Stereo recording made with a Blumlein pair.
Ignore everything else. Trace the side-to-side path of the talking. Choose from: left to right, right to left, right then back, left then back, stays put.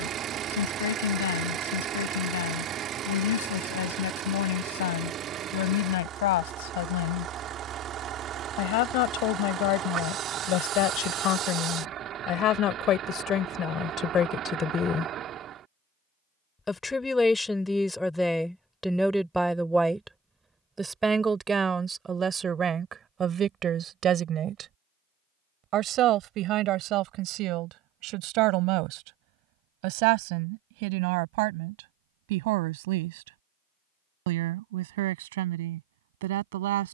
left to right.